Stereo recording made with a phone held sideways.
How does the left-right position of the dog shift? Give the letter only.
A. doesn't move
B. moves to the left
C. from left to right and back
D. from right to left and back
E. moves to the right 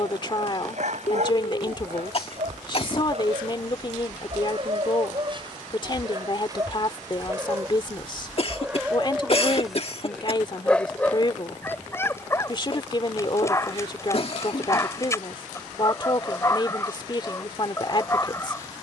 B.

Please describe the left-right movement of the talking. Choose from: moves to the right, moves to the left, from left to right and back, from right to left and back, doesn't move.
doesn't move.